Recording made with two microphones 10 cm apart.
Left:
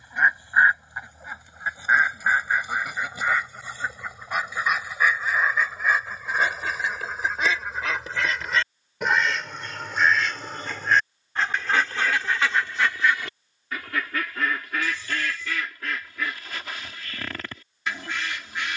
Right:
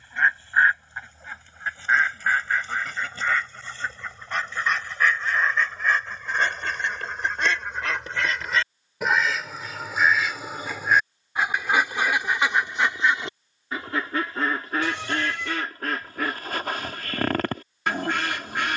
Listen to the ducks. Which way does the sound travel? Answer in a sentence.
In this clip you hear the ducks travel towards the right.